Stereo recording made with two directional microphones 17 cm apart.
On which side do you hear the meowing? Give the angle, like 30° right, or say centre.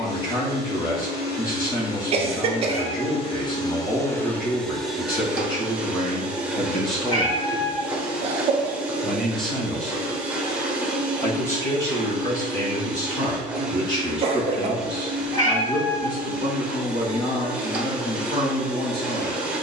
20° left.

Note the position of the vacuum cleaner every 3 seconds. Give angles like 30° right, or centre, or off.
60° left, 10° left, 10° right, 10° right, 10° right, 10° right, 10° right.